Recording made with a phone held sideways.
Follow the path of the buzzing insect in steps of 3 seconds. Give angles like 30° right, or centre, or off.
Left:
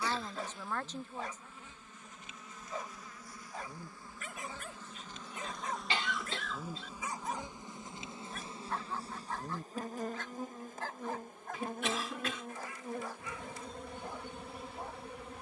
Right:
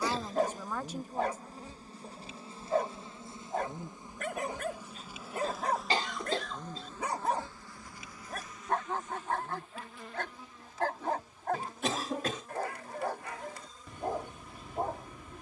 40° right, 10° right, 20° left, 50° left, 60° left.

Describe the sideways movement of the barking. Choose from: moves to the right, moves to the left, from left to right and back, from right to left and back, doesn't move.
doesn't move.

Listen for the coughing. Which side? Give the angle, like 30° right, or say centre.
40° right.